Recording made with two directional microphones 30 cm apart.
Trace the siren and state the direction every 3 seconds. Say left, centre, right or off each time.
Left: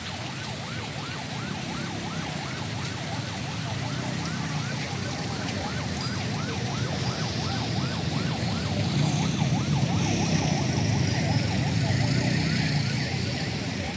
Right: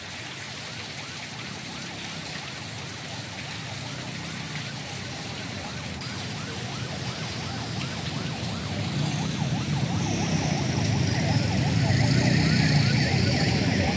left, left, left, centre, right.